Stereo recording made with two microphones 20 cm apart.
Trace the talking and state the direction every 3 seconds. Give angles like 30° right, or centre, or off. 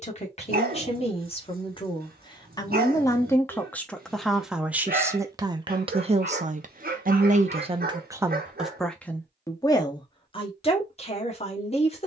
30° left, centre, 30° right, 30° left.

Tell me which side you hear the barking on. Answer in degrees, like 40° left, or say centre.
50° right.